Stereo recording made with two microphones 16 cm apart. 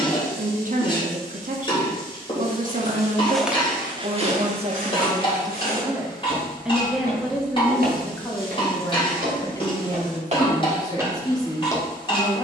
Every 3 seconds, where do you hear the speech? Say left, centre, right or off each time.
right, right, centre, left.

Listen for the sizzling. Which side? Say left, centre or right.
left.